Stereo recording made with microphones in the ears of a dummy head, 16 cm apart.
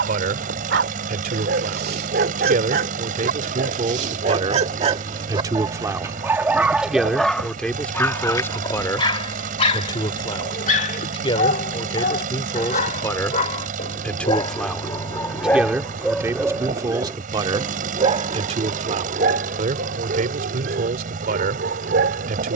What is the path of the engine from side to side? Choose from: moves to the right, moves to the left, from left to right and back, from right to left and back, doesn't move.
doesn't move.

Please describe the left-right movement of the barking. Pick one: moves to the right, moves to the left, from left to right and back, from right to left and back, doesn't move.
from right to left and back.